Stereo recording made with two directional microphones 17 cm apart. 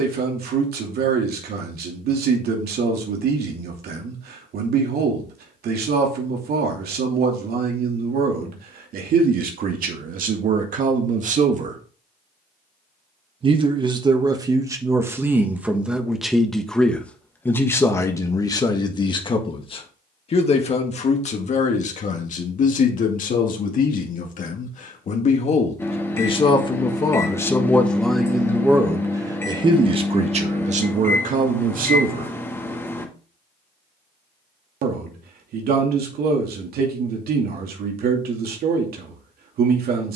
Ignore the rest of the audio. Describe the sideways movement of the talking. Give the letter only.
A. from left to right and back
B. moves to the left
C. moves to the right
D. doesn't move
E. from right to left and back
E.